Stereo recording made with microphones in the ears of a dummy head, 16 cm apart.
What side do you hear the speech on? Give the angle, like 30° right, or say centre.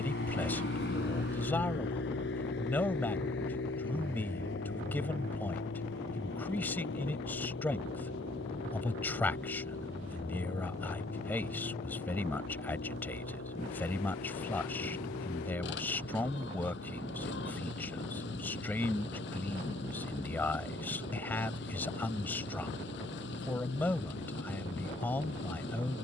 10° left.